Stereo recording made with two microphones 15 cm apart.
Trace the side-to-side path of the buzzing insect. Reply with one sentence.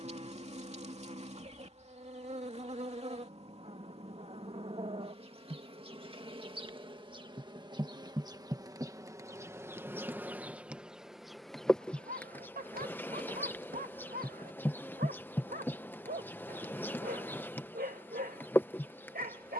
You can hear the buzzing insect move from right to left.